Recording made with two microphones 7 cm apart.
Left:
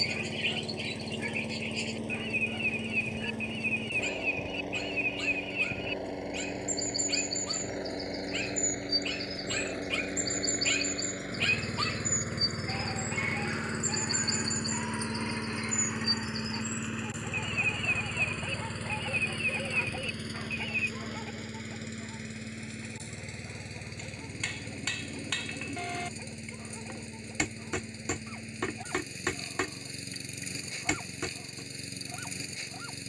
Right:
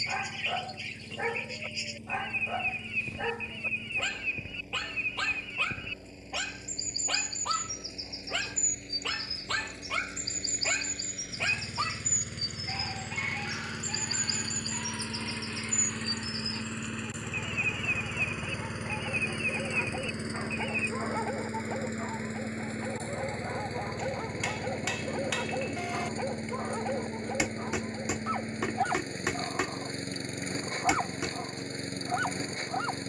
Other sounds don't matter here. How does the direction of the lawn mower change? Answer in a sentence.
In this clip you hear the lawn mower travel towards the right.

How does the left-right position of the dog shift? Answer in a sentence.
In this clip you hear the dog move from right to left and back again.